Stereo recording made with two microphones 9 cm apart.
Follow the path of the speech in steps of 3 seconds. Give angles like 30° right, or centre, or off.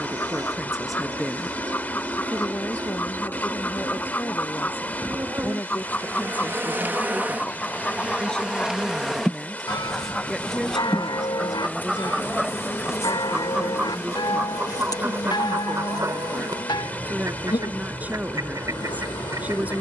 centre, 30° left, 10° left, centre, 20° right, 20° right, 20° right.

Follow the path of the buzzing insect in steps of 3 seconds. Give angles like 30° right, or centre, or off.
50° right, 40° right, 20° right, 10° left, 30° left, 50° left, 60° left.